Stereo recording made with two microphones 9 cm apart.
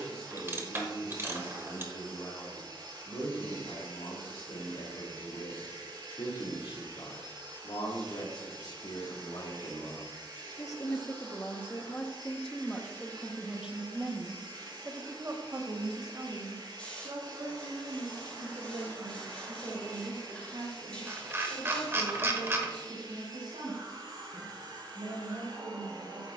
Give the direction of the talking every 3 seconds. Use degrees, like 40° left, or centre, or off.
80° left, 70° left, 60° left, 40° left, 10° right, 40° right, 60° right, 70° right, 70° right.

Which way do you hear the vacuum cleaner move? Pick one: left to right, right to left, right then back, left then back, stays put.
stays put.